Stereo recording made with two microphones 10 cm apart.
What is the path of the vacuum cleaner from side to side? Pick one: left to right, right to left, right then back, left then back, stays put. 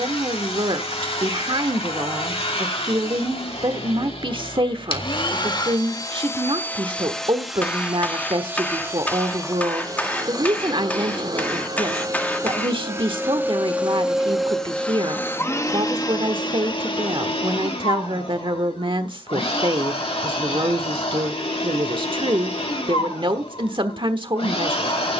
right then back.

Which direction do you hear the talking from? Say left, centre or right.
right.